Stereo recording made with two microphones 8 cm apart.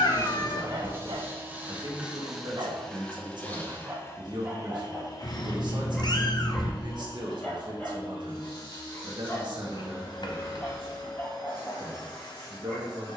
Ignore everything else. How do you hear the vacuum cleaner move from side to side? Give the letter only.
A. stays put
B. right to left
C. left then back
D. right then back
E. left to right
B.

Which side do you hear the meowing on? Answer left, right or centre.
left.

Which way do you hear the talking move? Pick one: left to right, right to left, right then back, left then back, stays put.
stays put.